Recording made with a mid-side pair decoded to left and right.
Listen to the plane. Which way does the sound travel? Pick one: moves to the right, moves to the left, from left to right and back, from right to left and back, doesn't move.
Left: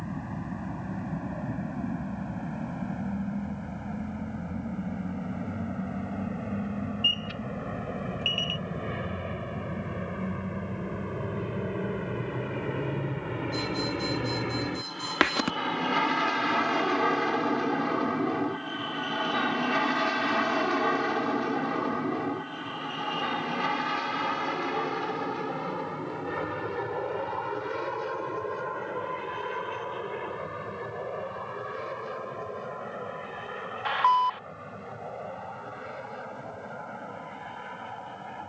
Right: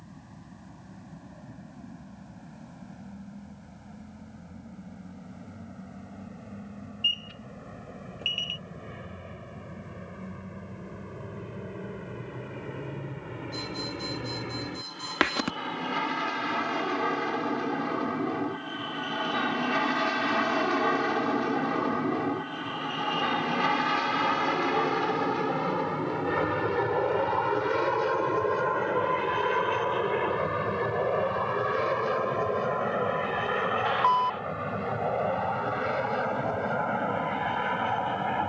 moves to the right.